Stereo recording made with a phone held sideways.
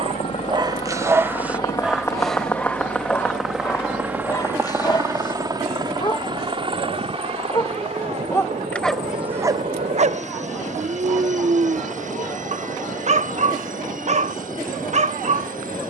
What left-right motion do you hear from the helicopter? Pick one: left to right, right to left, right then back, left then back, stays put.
left to right.